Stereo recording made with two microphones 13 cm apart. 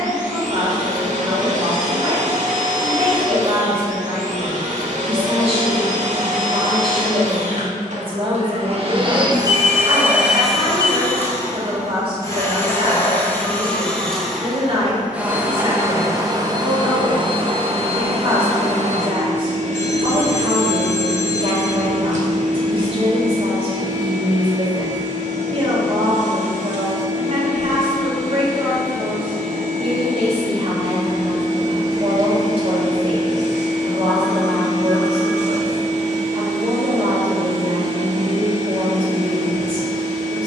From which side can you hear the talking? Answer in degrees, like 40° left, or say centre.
40° right.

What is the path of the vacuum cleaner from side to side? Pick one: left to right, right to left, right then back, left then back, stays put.
left then back.